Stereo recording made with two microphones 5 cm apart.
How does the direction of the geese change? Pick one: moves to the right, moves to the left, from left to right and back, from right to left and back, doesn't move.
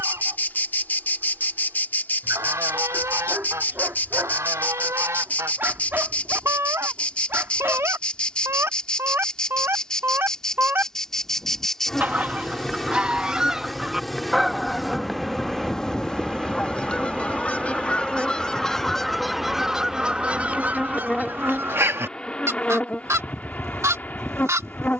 from right to left and back.